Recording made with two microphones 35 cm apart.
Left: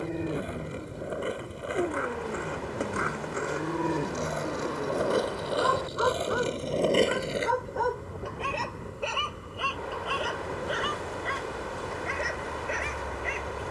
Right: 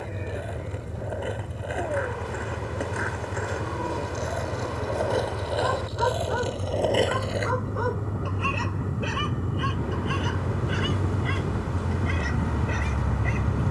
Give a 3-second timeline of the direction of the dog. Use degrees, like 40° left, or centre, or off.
50° left, 30° left, 10° right, 30° right, 50° right.